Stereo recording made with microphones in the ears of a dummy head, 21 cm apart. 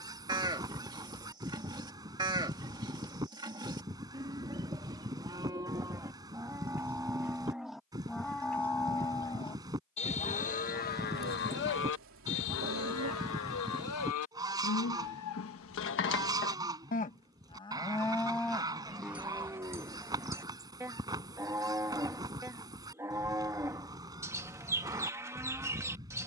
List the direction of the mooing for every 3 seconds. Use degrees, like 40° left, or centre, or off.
20° right, 20° right, centre, 40° left, 70° left, 50° left, 10° right, 10° right, 10° right.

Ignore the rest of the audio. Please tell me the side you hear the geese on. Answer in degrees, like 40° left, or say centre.
20° right.